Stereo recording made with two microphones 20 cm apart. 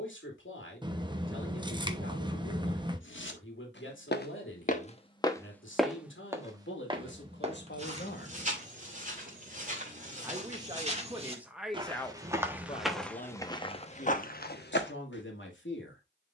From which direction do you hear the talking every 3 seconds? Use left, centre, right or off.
left, left, left, centre, left, left.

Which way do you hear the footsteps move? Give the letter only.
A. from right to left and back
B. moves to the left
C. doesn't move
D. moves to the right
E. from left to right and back
E.